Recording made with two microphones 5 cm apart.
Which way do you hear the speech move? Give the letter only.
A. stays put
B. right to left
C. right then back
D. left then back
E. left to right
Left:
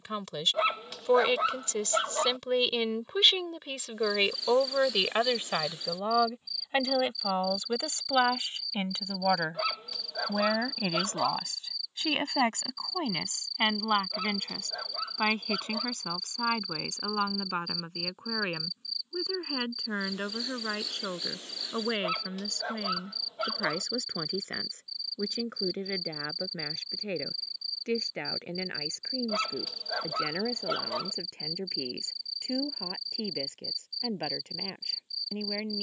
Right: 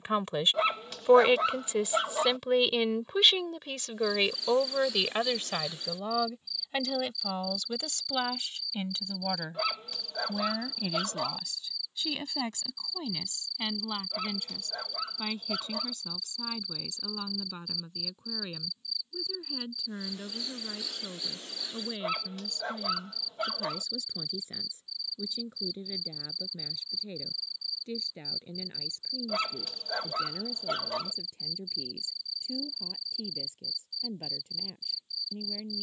B.